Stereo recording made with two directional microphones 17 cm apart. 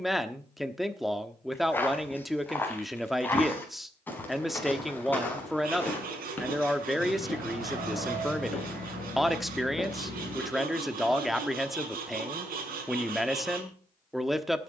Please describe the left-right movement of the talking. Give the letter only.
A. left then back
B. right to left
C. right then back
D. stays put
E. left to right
D.